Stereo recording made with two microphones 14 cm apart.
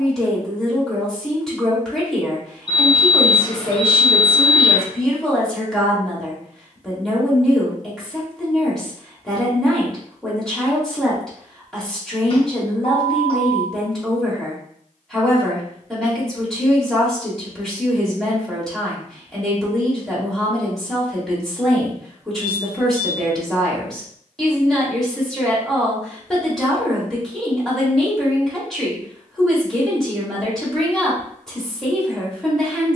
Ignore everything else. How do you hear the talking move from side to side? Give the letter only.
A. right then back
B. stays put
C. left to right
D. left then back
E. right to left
B.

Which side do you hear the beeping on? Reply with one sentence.
In this clip you hear the beeping on the left.